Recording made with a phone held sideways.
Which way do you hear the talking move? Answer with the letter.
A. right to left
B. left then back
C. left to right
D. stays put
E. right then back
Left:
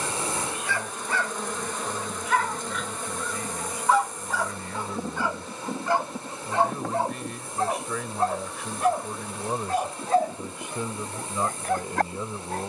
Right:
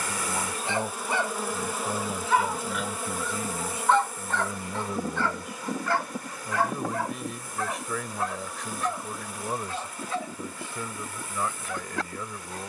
A.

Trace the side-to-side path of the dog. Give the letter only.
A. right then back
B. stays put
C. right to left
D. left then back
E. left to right
C.